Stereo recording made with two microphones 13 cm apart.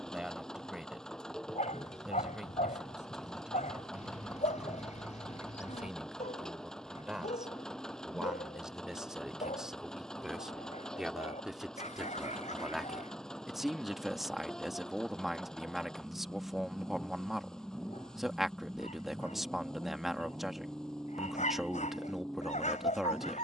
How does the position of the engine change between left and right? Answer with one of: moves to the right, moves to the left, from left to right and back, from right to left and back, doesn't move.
doesn't move.